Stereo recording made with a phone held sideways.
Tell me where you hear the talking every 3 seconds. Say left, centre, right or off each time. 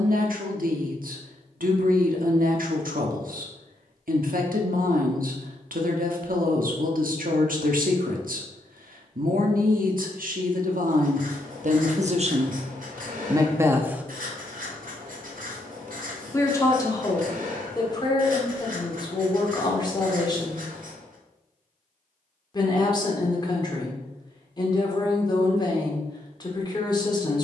right, right, right, right, right, left, left, left, left.